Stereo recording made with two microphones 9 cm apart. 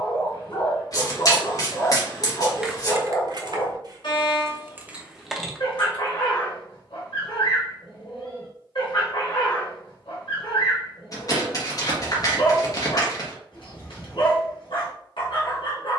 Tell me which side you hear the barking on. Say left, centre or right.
left.